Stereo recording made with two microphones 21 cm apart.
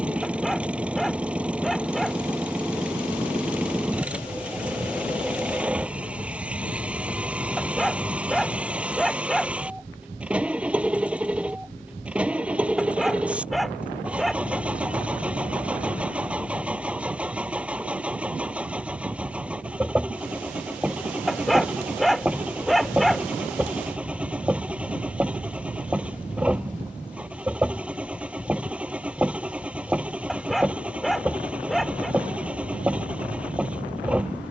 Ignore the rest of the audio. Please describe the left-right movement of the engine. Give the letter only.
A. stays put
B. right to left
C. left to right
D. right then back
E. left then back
A.